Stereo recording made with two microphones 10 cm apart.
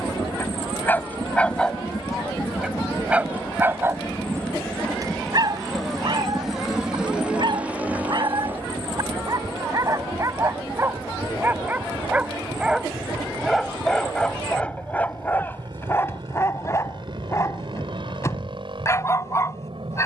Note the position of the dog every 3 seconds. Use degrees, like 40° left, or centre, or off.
10° left, 30° right, 50° right, 30° right, centre, 30° left, 30° left.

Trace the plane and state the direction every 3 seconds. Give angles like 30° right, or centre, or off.
40° left, 10° left, 10° right, 30° right, 40° right, 50° right, 50° right.